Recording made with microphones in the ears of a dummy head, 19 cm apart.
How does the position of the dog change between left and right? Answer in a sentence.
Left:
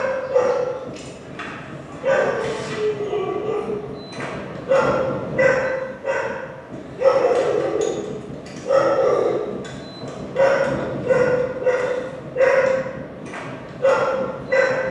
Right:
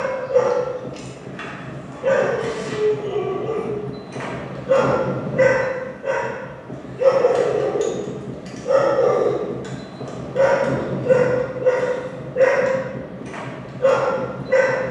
You can hear the dog stay in one place.